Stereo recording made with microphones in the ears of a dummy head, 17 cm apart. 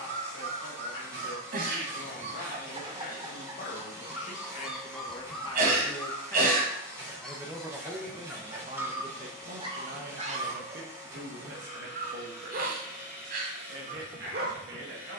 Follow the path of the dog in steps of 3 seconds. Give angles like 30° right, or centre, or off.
50° right, 10° right, centre, 30° right, 60° right.